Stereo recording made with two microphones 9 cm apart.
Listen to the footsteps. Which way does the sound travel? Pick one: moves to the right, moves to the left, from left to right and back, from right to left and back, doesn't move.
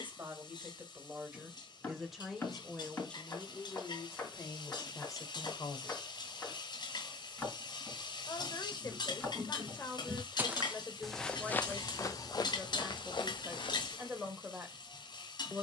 moves to the left.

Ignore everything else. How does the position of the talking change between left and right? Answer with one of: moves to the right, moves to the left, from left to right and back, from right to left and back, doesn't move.
from right to left and back.